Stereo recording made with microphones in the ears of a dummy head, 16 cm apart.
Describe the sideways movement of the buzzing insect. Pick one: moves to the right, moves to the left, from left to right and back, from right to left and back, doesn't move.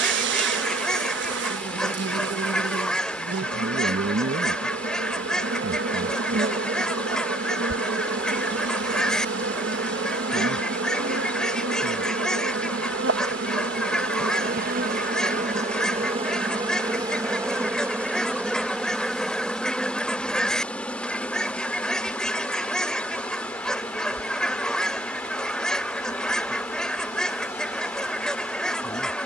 moves to the left.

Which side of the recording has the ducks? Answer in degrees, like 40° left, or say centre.
centre.